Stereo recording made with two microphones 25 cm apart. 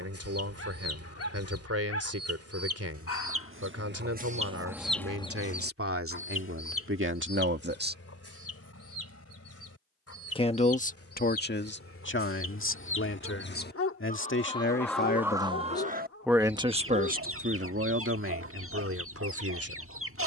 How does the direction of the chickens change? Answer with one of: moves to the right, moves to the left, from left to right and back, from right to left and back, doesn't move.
from right to left and back.